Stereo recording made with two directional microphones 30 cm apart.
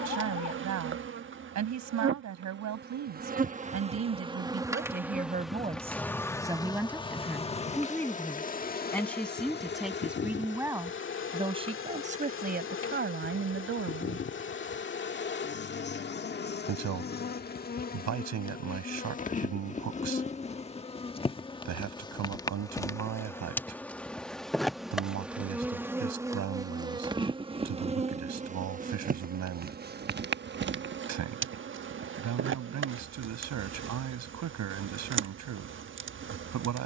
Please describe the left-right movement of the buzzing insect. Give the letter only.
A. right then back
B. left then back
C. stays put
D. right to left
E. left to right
B.